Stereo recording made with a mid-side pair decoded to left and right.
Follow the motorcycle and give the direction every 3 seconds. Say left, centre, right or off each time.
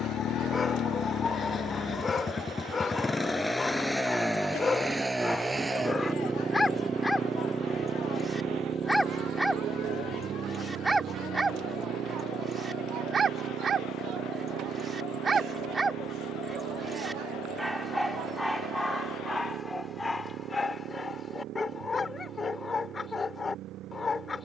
left, centre, right, right, right, right, right, right.